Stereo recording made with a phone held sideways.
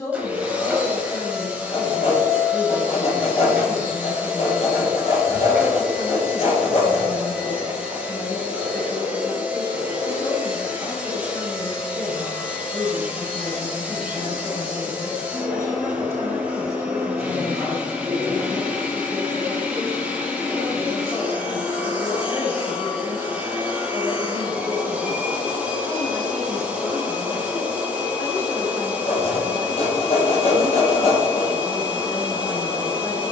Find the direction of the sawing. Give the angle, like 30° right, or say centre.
50° left.